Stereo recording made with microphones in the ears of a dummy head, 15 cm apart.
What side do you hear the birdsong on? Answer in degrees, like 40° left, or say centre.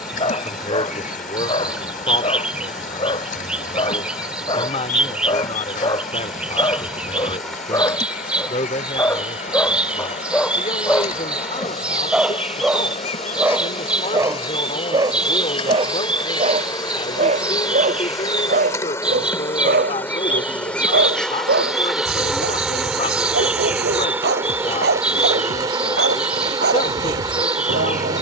10° right.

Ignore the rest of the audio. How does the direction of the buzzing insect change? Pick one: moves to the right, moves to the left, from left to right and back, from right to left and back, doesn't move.
moves to the right.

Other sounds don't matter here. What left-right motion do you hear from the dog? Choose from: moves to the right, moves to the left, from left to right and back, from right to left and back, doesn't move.
moves to the right.